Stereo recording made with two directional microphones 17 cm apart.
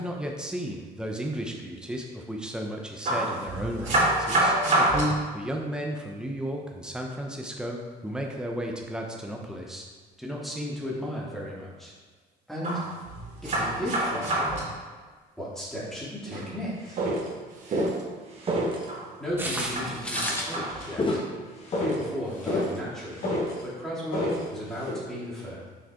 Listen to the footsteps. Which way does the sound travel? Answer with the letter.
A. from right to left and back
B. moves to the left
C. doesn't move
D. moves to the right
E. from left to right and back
B.